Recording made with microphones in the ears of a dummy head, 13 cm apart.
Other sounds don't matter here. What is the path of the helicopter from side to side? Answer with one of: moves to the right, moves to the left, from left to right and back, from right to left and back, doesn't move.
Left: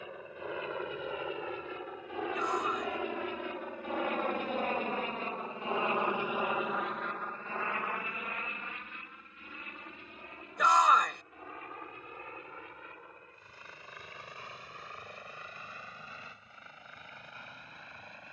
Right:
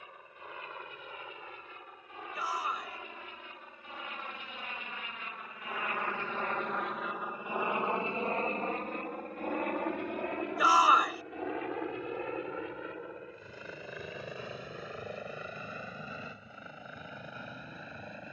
moves to the right.